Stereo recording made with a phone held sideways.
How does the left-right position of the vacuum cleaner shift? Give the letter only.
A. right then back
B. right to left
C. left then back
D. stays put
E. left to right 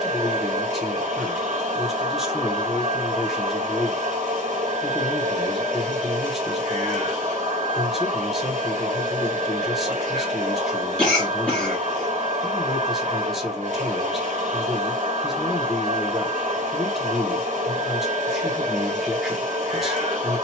D.